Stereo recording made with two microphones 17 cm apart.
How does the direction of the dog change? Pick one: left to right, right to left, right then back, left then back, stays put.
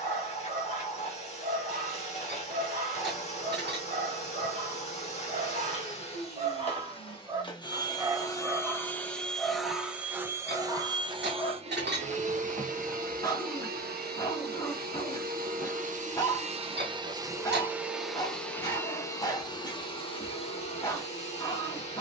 right to left.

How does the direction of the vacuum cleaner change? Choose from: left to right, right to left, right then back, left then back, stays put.
right then back.